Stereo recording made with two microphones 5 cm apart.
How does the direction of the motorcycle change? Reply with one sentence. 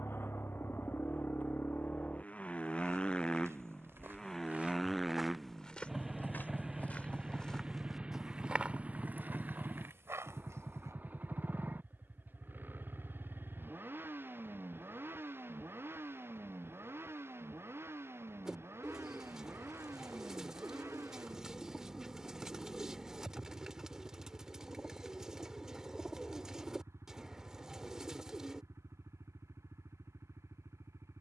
You can hear the motorcycle move from left to right.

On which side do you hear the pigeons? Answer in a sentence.
In this clip you hear the pigeons in the centre.